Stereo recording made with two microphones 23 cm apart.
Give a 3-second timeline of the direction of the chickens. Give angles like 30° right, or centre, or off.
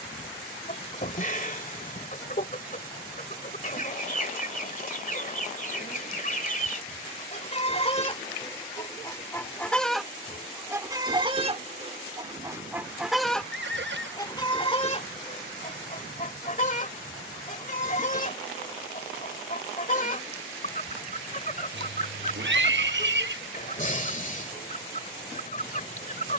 40° left, 40° left, 30° left, 10° right, centre, 30° left, 40° left, 40° left, 40° left.